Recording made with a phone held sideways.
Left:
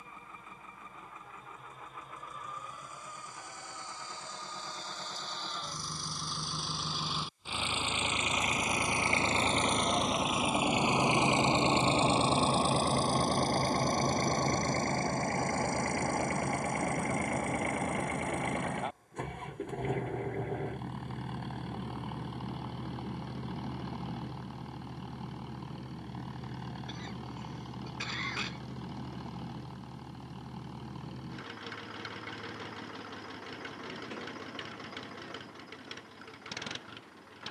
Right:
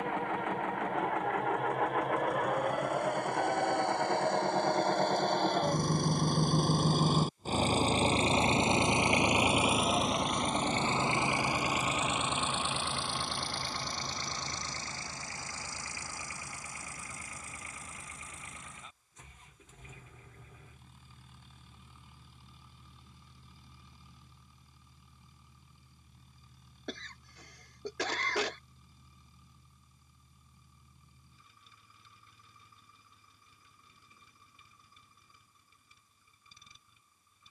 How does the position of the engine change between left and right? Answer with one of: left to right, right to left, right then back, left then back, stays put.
right to left.